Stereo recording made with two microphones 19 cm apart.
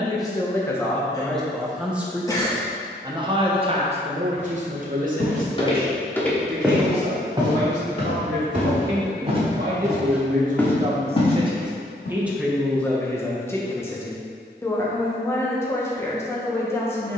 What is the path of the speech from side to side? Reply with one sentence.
In this clip you hear the speech move from left to right and back again.